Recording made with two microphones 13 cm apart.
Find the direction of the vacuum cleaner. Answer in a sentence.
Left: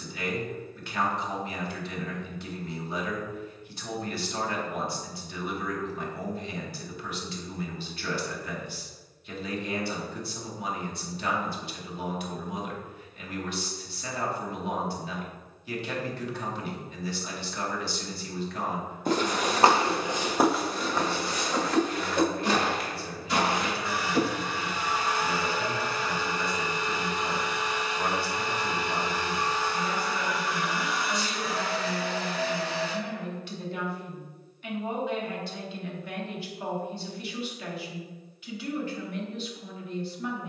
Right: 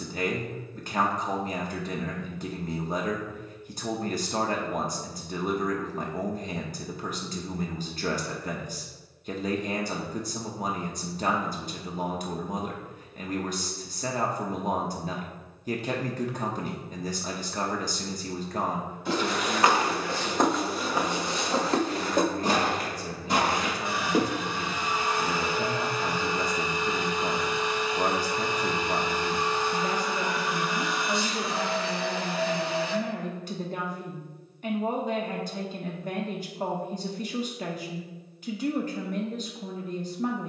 You can hear the vacuum cleaner on the right.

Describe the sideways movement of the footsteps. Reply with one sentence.
In this clip you hear the footsteps move from left to right.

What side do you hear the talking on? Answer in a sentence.
In this clip you hear the talking on the right.